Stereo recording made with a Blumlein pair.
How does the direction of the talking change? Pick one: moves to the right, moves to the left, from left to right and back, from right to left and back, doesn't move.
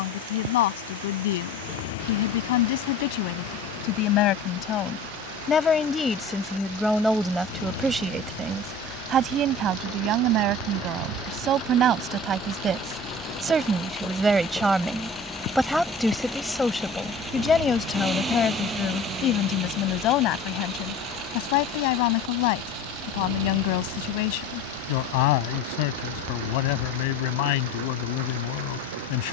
from left to right and back.